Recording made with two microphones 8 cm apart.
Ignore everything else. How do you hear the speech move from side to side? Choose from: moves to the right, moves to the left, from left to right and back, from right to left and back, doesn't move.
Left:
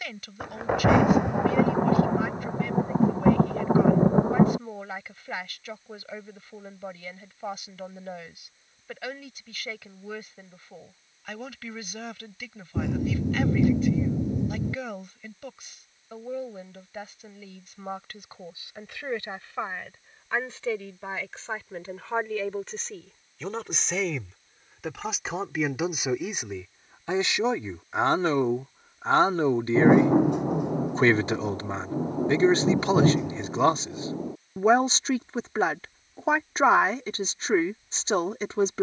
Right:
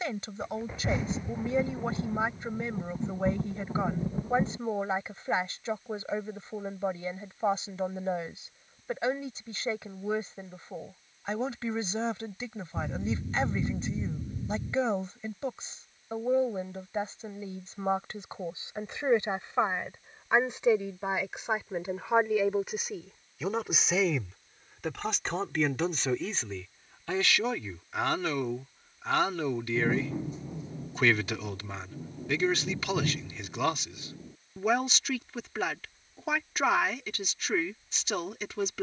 moves to the left.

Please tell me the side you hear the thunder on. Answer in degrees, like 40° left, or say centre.
70° left.